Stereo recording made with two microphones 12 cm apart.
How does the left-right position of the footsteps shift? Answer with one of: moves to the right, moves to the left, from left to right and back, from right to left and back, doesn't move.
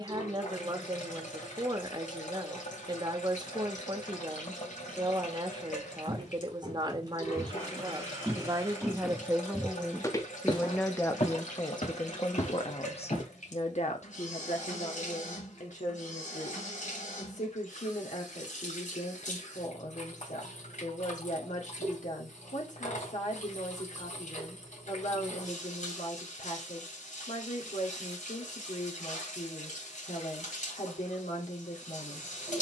moves to the left.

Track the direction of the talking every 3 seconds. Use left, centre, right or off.
right, right, right, centre, left, left, left, left, left, left, left.